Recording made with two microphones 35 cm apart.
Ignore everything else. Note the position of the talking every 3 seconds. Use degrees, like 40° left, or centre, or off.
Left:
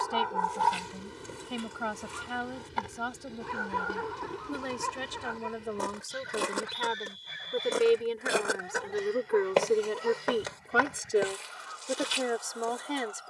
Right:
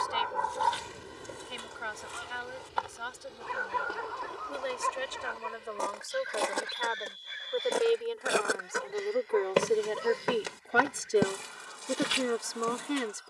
60° left, 60° left, 40° left, 10° left, 10° right.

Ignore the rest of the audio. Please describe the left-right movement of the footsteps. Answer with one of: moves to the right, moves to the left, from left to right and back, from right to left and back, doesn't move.
moves to the right.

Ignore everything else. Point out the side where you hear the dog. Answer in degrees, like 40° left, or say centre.
50° left.